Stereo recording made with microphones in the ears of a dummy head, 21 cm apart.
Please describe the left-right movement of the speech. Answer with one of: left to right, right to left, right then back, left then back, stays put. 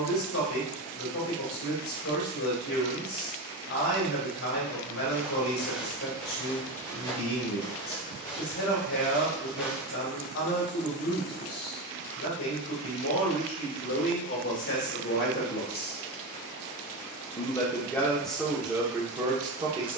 left to right.